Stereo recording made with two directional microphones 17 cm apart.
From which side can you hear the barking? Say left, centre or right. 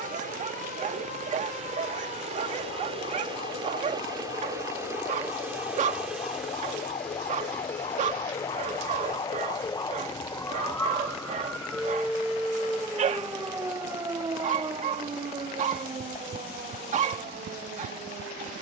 right.